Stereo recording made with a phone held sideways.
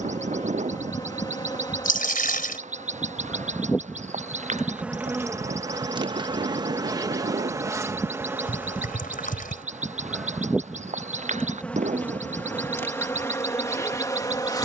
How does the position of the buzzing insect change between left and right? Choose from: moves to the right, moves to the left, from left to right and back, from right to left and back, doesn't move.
from left to right and back.